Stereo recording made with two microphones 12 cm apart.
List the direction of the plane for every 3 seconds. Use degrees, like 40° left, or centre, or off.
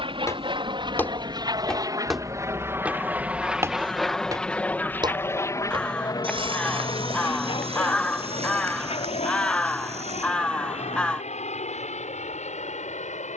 40° right, 10° left, 40° left, 60° left, 70° left.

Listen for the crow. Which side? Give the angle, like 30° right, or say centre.
10° left.